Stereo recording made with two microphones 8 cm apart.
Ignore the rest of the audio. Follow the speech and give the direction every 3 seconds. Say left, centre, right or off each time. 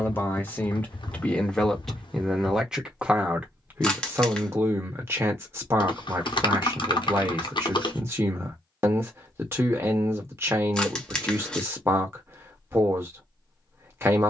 centre, right, right, right, right.